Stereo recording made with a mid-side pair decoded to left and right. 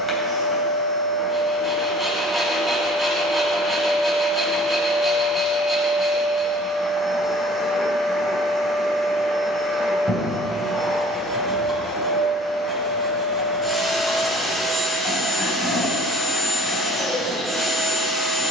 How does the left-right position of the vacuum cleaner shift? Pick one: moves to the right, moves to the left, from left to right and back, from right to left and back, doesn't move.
doesn't move.